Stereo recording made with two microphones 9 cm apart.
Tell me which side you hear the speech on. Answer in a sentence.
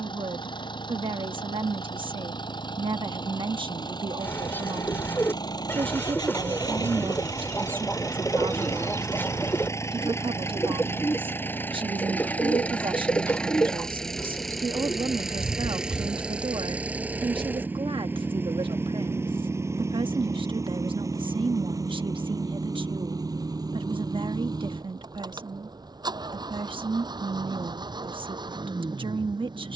In this clip you hear the speech on the right.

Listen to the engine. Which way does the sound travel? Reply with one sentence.
In this clip you hear the engine move from left to right.